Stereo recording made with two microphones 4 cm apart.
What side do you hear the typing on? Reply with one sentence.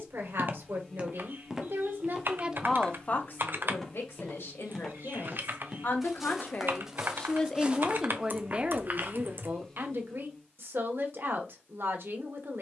You can hear the typing on the right.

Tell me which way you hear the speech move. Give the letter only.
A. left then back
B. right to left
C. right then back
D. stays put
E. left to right
A.